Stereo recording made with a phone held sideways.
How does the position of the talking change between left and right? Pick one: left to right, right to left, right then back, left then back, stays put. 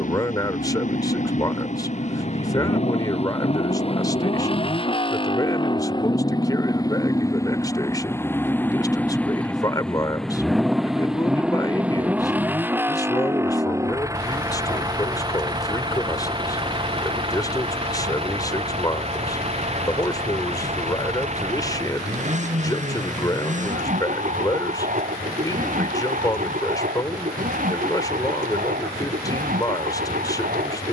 stays put.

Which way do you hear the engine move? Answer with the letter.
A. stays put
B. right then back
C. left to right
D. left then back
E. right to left
C.